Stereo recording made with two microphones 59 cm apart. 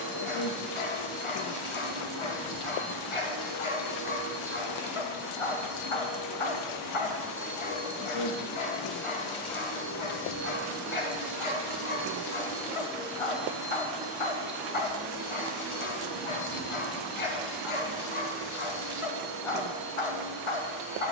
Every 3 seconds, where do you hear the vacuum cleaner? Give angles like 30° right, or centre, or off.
50° right, 40° right, 20° right, 20° left, centre, 40° right, 50° right.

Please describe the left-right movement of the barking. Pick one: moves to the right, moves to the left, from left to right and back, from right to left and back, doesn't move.
doesn't move.